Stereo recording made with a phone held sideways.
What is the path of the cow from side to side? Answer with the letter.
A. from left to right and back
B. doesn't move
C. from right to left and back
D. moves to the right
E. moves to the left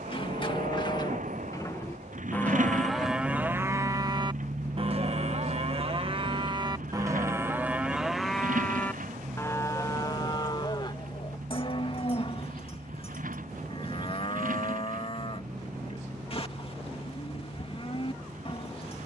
A.